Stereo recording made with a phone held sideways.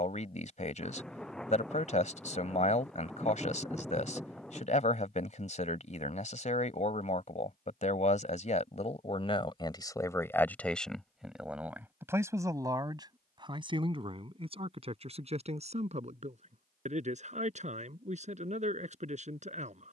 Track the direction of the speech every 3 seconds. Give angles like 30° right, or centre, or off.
50° left, 50° left, 50° left, 10° left, 30° right, 40° right, 50° right.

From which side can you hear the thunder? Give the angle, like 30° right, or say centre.
centre.